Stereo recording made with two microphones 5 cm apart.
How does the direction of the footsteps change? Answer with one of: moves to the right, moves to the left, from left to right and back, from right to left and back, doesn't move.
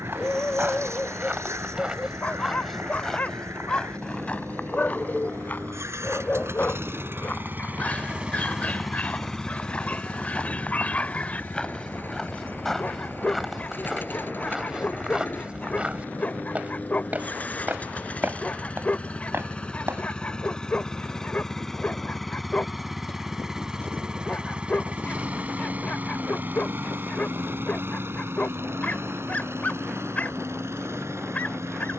from right to left and back.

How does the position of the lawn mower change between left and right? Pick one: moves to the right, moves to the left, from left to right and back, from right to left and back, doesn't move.
from right to left and back.